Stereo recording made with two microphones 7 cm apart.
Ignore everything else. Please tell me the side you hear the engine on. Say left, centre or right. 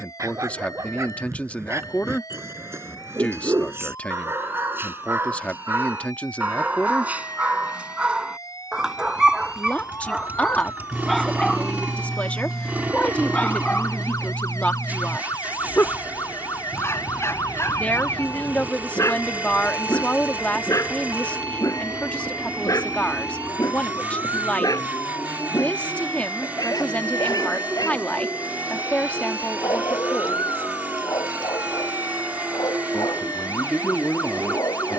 right.